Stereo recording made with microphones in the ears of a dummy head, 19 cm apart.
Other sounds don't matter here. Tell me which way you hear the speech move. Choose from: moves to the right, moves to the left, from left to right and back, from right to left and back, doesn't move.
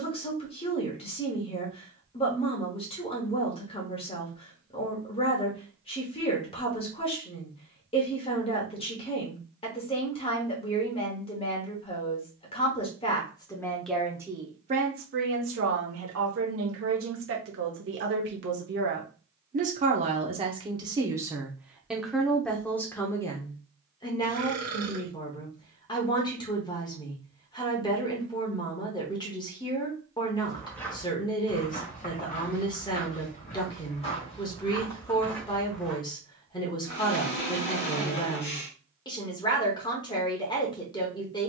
from left to right and back.